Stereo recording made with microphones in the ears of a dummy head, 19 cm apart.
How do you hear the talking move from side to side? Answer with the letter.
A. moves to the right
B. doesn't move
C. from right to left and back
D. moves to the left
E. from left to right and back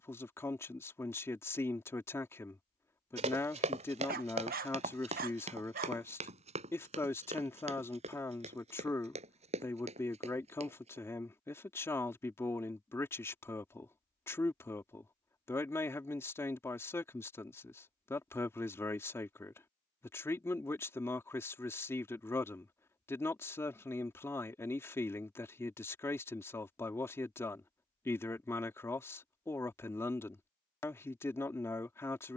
B.